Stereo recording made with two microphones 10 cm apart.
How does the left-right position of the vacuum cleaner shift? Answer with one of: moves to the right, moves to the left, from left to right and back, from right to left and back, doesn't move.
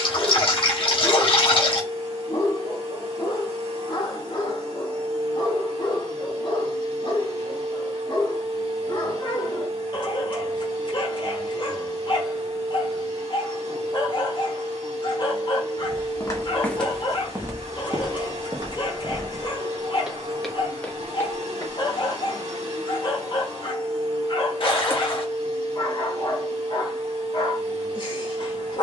doesn't move.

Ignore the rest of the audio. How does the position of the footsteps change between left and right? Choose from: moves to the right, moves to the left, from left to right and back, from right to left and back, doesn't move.
from left to right and back.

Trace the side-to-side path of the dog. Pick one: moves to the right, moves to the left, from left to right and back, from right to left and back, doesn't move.
doesn't move.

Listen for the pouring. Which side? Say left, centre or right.
left.